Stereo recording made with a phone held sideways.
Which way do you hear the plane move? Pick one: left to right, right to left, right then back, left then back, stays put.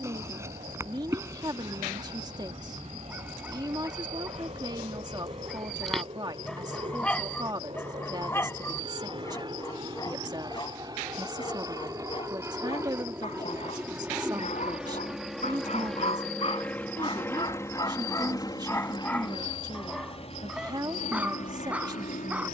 right to left.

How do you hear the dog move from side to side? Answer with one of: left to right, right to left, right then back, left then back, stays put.
left then back.